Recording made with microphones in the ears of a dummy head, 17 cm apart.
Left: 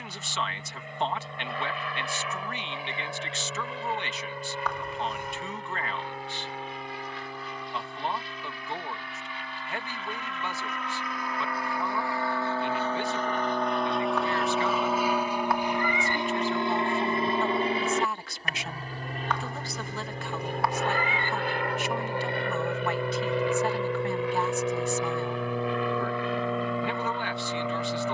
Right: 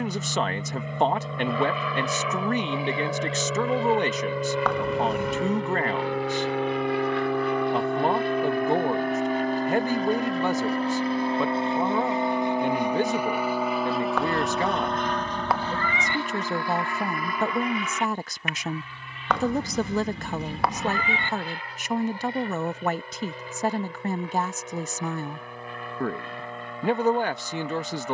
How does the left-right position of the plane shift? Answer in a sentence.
In this clip you hear the plane move to the left.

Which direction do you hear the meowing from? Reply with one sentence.
You can hear the meowing on the right.